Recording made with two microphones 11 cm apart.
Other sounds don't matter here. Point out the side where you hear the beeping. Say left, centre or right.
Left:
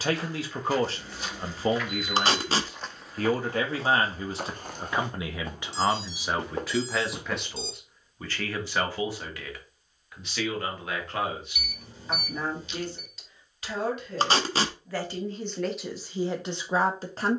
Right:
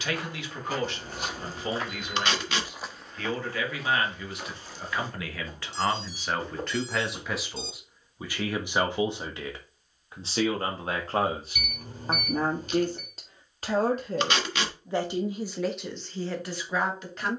right.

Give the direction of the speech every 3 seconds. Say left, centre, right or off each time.
left, left, centre, right, right, centre.